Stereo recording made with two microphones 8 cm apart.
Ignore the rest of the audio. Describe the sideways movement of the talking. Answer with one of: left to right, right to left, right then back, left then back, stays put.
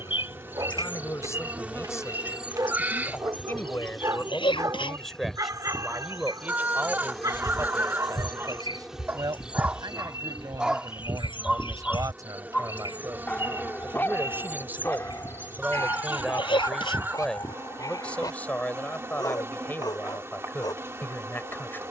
right then back.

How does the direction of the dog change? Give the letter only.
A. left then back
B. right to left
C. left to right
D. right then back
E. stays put
B.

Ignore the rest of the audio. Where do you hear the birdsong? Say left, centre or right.
left.